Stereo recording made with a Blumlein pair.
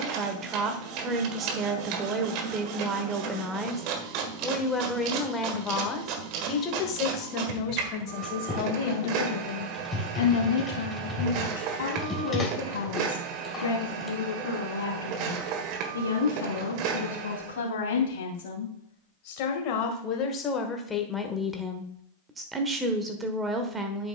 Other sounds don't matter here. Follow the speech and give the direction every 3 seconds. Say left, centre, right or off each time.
right, centre, left, left, left, left, left, centre.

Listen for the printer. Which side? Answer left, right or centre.
right.